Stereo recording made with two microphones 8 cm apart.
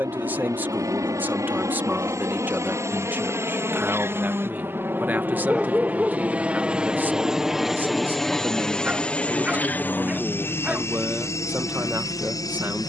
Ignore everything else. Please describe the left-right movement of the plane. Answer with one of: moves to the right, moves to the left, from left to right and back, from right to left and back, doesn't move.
moves to the left.